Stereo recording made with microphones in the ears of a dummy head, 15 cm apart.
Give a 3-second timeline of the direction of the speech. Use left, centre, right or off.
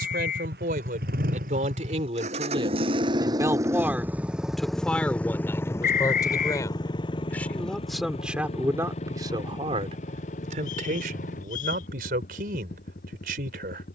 right, centre, centre, right, right.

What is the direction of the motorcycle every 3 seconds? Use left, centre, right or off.
right, centre, left, left, left.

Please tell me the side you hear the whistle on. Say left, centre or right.
left.